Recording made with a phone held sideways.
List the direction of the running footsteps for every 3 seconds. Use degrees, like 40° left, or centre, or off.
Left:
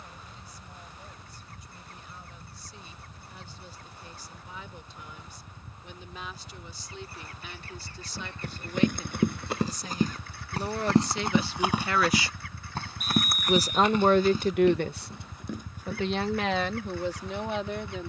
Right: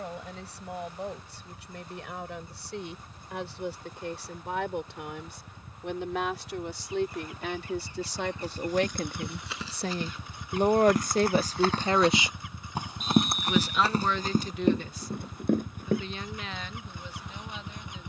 off, off, 60° left, 30° left, 30° right, 50° right.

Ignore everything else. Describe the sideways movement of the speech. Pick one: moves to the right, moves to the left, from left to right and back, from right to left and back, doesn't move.
moves to the left.